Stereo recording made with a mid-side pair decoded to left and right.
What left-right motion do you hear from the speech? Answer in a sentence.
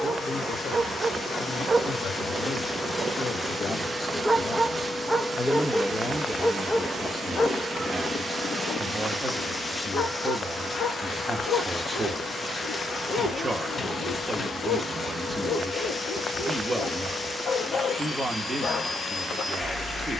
You can hear the speech move from left to right.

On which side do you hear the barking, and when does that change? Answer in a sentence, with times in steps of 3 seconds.
In this clip you hear the barking on the right from 0 s, in the centre from 3 s and on the left from 6 s.